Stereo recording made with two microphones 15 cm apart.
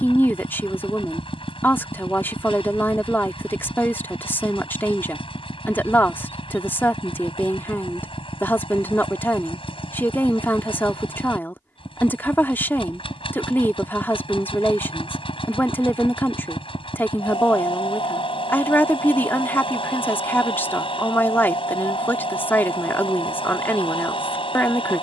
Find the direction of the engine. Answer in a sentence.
You can hear the engine on the left.